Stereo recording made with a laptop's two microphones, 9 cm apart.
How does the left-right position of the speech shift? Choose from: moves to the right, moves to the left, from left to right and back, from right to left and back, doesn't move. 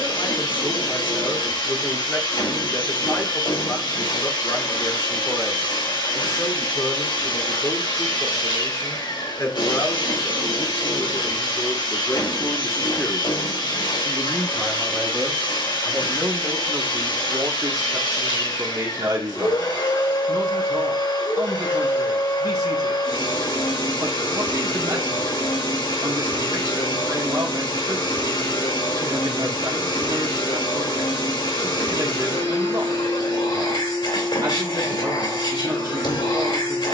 moves to the right.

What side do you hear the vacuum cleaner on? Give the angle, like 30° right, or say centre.
60° left.